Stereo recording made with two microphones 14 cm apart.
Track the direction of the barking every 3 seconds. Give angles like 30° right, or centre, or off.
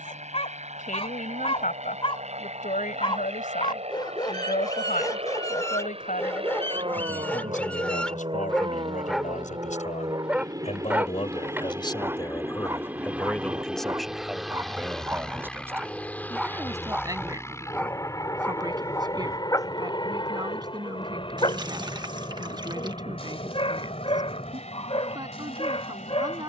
50° left, 30° left, 10° left, 10° right, 20° right, centre, 20° left, 40° left, 40° left.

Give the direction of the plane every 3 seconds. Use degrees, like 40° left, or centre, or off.
60° right, 50° right, 40° right, 30° right, 10° right, 10° left, 30° left, 40° left, 50° left.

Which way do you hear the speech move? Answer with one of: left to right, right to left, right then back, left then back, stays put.
left to right.